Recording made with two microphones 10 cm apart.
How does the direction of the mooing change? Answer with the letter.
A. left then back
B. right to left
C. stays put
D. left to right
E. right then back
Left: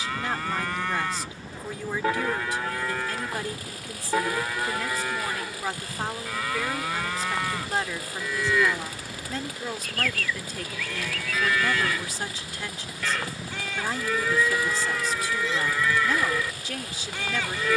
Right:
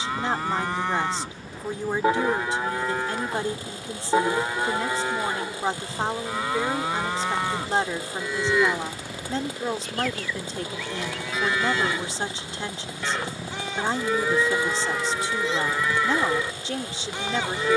C.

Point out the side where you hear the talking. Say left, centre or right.
right.